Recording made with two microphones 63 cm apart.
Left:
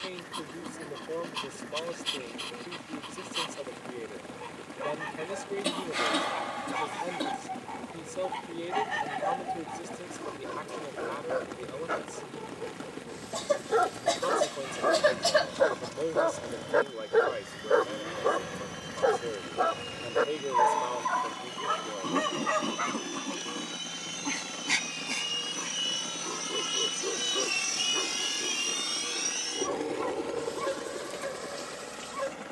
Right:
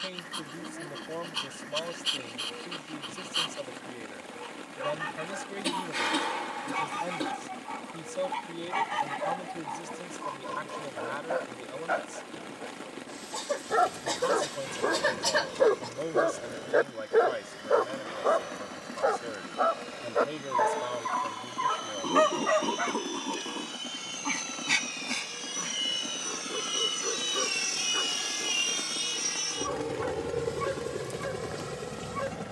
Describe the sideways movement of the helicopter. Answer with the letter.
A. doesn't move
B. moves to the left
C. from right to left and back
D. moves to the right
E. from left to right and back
D.